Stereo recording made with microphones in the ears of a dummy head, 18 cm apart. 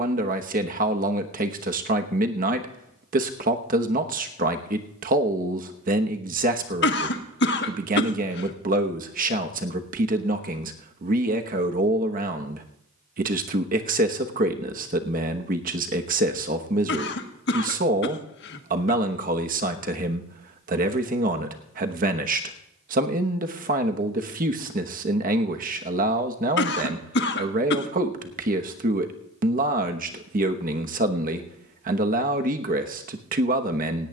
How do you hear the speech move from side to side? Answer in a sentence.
In this clip you hear the speech stay in one place.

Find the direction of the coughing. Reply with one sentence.
In this clip you hear the coughing on the left.